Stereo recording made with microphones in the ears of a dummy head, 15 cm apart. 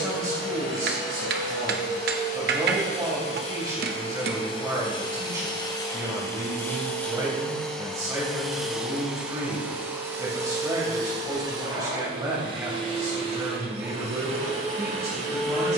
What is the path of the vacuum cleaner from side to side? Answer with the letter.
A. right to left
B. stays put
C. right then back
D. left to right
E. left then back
D.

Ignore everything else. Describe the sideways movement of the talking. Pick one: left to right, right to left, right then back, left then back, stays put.
stays put.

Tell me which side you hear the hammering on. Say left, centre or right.
right.